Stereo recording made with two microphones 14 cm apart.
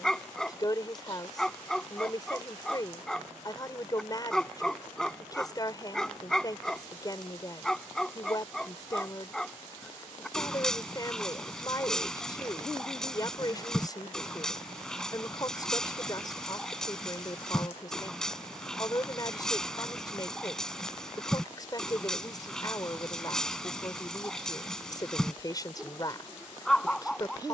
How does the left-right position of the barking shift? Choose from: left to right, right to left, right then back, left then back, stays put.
stays put.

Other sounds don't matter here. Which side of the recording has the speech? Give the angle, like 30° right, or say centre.
30° left.